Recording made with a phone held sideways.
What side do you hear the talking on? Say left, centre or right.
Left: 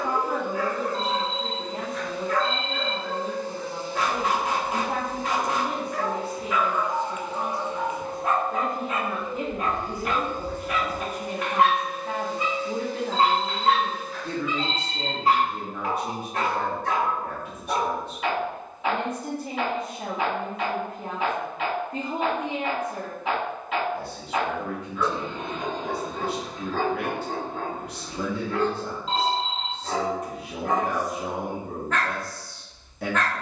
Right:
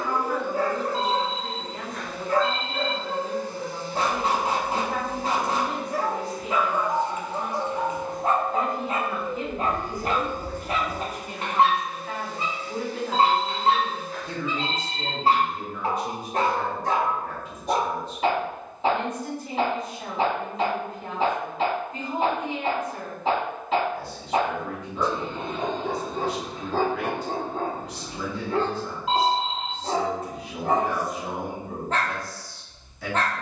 left.